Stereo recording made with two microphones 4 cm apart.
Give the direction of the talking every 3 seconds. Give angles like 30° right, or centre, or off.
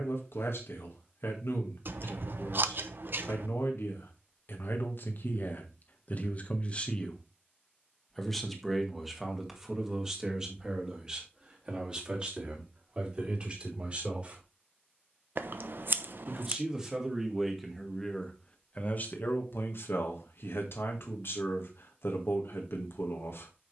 80° left, 70° left, 20° left, 20° right, 30° right, 10° right, 60° left, 70° left.